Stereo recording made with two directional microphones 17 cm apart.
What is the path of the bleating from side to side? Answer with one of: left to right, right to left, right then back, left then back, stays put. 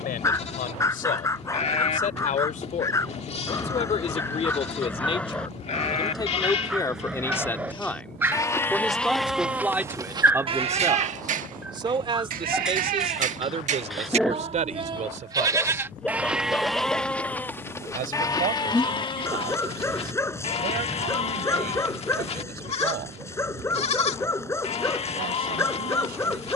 right then back.